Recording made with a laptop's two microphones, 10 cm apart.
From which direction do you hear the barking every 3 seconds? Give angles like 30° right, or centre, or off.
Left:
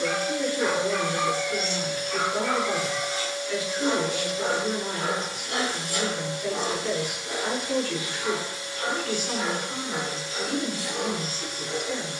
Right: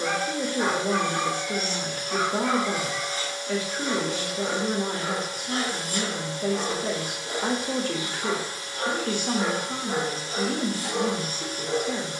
20° right, 40° left, centre, 30° right.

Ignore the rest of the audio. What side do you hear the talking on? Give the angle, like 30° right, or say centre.
40° right.